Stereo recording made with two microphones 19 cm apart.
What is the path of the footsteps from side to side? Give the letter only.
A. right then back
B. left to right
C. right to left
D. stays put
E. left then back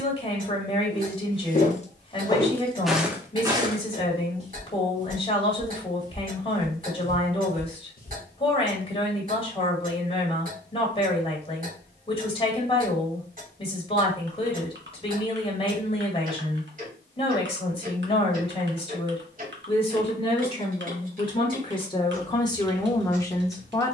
A.